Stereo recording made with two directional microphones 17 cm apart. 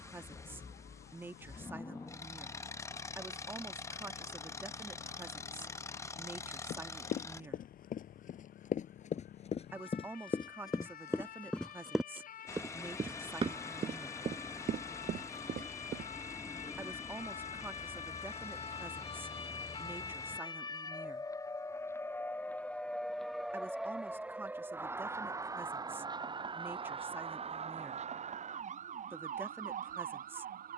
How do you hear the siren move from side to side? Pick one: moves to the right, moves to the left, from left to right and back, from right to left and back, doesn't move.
moves to the right.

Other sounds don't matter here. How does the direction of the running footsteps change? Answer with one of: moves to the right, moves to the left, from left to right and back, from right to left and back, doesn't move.
moves to the right.